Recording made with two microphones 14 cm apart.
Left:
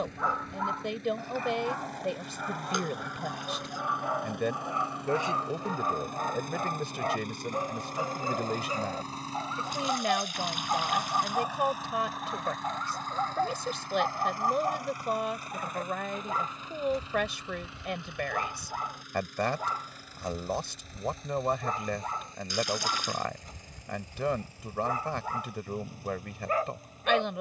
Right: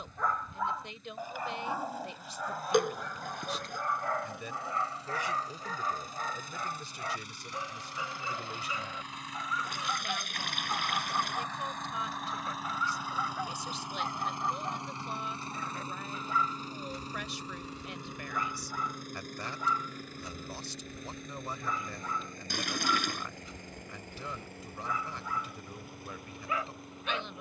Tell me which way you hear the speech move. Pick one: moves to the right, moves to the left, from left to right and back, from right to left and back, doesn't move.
doesn't move.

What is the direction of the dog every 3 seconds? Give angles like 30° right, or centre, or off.
centre, 20° left, 40° left, 50° left, 50° left, 50° left, 50° left, 50° left, 50° left.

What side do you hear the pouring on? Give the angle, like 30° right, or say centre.
60° right.